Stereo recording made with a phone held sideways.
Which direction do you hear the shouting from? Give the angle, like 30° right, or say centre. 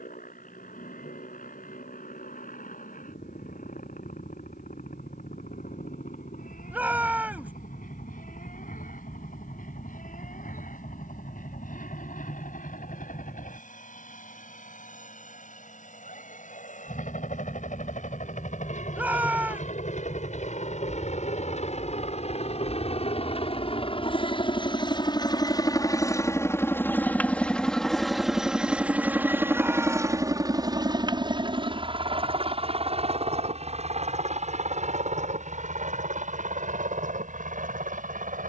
10° right.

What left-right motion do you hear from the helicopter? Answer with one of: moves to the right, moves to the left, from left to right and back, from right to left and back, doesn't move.
moves to the right.